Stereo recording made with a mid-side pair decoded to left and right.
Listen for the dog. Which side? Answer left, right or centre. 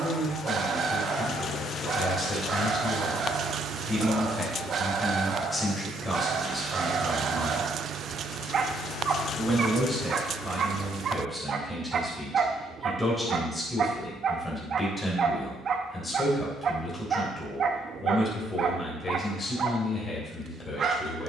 right.